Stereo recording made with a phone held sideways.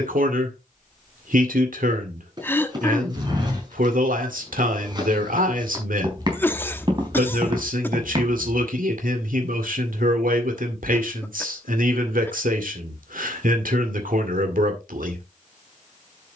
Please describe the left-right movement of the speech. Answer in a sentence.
You can hear the speech stay in one place.